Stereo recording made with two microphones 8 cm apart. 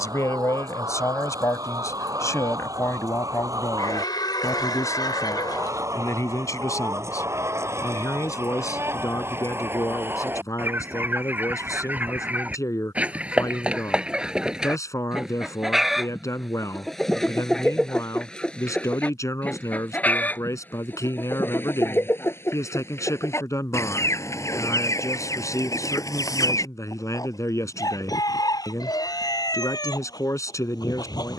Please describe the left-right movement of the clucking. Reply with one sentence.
You can hear the clucking travel towards the left.